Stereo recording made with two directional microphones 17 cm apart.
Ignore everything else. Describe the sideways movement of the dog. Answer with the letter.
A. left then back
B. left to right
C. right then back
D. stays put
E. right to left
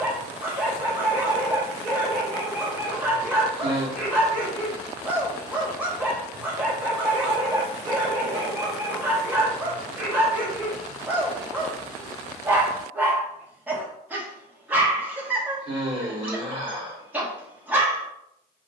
D.